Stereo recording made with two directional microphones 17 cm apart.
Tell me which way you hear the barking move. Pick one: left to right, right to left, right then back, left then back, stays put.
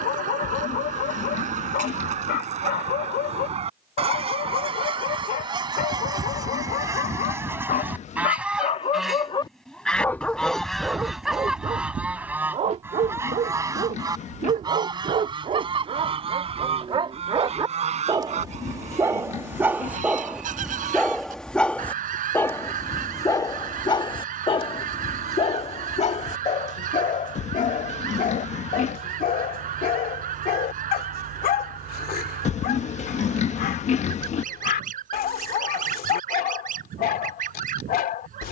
right then back.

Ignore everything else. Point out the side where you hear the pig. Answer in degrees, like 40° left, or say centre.
40° left.